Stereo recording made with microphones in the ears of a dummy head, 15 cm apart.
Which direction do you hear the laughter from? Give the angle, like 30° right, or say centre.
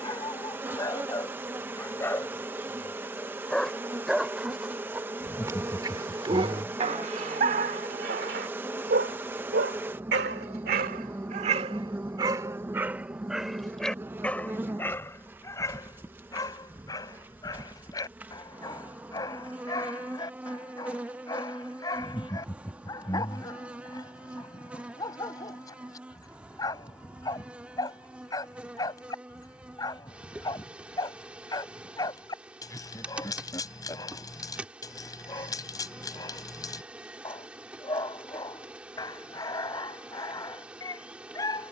20° left.